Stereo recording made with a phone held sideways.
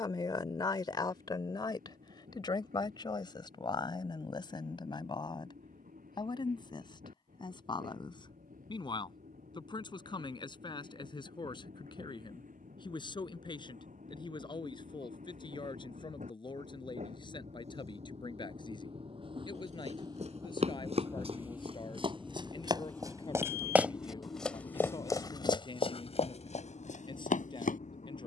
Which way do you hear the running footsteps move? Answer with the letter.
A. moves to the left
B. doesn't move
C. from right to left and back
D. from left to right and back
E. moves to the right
A.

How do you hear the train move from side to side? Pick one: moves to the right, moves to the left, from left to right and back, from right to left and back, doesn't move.
moves to the left.